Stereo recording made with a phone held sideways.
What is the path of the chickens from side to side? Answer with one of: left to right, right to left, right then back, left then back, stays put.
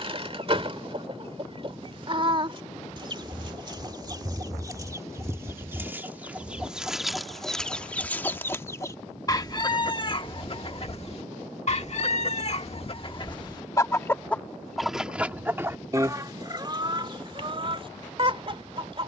left then back.